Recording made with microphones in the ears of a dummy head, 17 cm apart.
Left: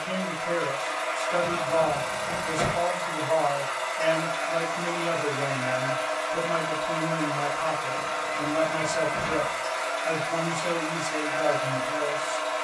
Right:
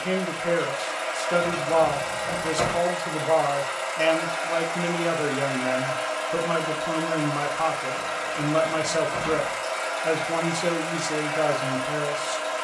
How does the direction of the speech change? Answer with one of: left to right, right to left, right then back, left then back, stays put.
stays put.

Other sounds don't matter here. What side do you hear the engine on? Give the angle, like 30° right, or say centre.
30° right.